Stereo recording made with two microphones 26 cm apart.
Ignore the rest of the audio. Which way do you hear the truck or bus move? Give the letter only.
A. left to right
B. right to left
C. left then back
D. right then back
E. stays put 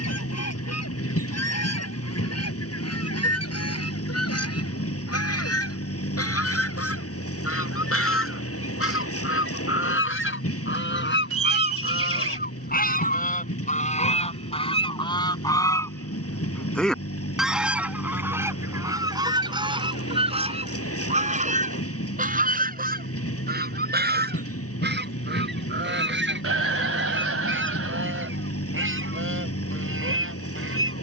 E.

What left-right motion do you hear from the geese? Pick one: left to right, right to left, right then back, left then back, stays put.
left to right.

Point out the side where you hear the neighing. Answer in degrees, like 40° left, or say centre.
60° right.